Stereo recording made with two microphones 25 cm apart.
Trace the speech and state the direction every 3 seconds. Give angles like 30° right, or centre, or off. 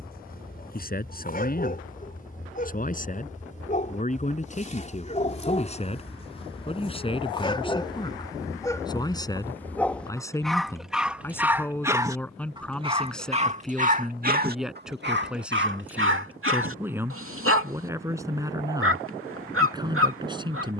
40° left, 30° left, 20° left, 10° left, centre, 10° right, 20° right.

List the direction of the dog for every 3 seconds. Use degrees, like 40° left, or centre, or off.
40° left, 30° left, 20° left, centre, 30° right, 60° right, 60° right.